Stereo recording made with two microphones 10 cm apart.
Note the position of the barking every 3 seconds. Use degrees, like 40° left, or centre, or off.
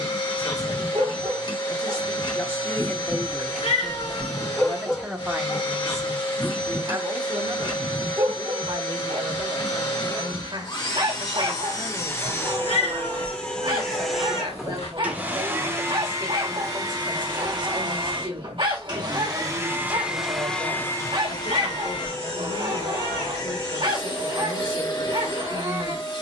50° right, centre, 30° right, 50° right, 50° right, 50° right, 50° right, 50° right, 50° right.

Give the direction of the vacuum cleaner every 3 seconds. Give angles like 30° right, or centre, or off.
50° left, 50° left, 50° left, 40° left, 10° left, 30° right, 20° right, 40° left, 40° left.